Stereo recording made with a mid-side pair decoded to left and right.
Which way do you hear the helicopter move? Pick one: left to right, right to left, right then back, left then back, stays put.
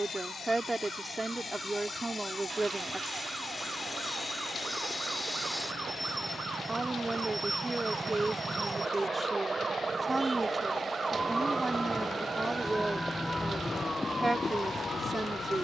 left to right.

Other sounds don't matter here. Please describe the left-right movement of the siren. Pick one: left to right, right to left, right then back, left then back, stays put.
right to left.